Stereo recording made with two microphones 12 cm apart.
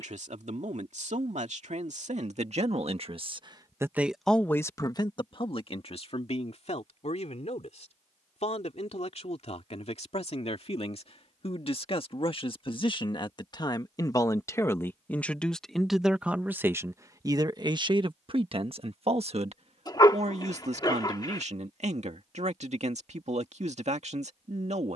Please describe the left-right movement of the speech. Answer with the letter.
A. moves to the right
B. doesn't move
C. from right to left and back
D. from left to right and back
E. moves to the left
C.